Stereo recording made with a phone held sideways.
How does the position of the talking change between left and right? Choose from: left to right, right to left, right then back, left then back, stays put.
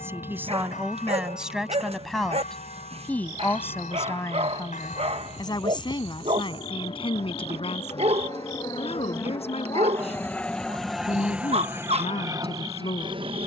right to left.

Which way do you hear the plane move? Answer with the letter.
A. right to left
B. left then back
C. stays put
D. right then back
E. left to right
E.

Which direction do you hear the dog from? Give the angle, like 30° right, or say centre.
50° right.